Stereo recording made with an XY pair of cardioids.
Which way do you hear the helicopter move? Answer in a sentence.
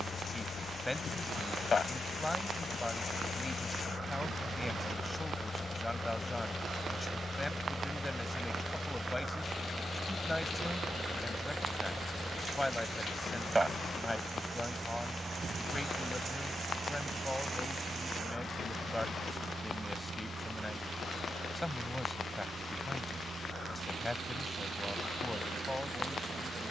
In this clip you hear the helicopter travel towards the right.